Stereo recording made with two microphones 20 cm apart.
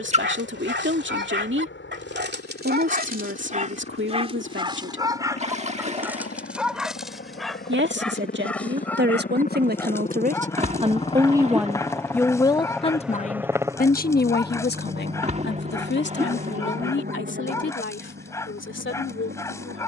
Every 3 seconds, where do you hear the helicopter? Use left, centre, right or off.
left, left, left, left, centre, right, right.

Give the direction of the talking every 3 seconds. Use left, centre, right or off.
right, right, right, right, left, left, left.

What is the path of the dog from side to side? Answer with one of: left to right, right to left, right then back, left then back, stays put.
right to left.